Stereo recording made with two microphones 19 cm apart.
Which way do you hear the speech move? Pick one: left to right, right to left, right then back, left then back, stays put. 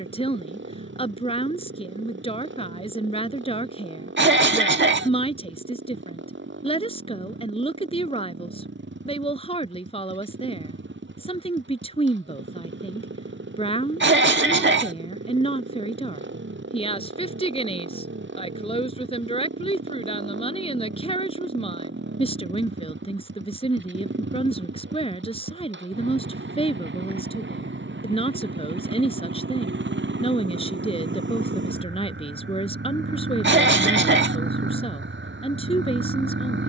stays put.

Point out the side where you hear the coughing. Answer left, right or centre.
right.